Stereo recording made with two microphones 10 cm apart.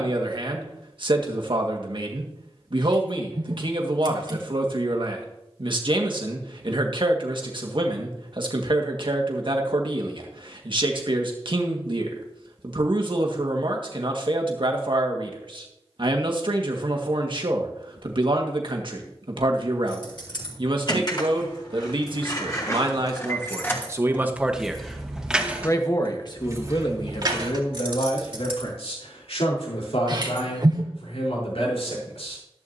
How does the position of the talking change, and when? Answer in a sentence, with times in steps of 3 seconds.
In this clip you hear the talking on the right from 0 s and on the left from 24 s.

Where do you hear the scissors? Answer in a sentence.
You can hear the scissors on the right.